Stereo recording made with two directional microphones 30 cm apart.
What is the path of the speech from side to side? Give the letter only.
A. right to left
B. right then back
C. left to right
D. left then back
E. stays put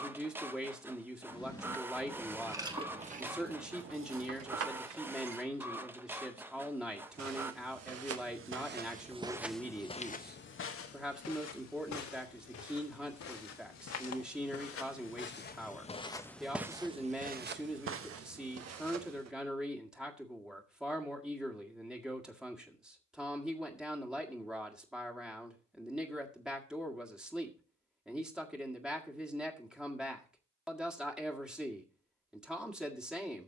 E.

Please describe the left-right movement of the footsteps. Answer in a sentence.
You can hear the footsteps move from right to left and back again.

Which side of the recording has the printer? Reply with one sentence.
In this clip you hear the printer in the centre.